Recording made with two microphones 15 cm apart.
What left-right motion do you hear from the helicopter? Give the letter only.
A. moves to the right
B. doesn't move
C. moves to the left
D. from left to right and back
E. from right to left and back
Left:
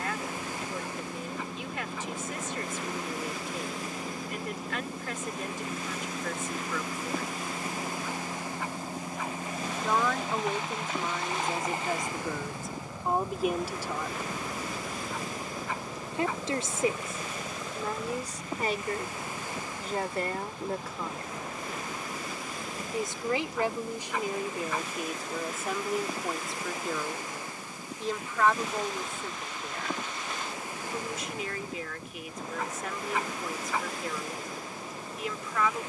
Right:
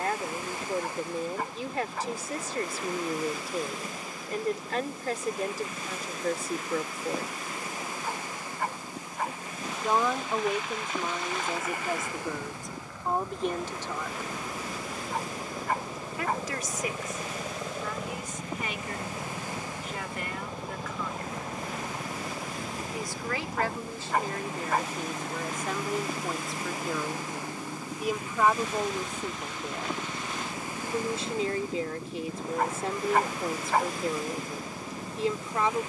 A.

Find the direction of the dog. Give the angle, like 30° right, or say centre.
50° right.